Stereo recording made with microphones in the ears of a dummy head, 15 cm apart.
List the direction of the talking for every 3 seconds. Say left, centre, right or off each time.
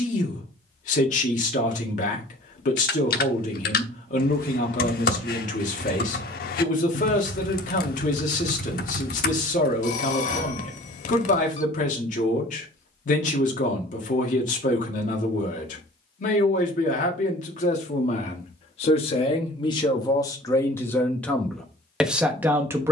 left, left, left, left, left, left, left, centre.